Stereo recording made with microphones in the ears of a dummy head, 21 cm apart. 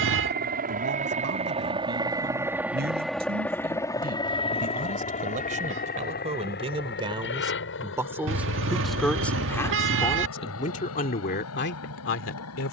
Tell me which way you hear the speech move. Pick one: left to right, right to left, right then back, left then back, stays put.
right to left.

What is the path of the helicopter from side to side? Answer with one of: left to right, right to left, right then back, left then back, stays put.
right to left.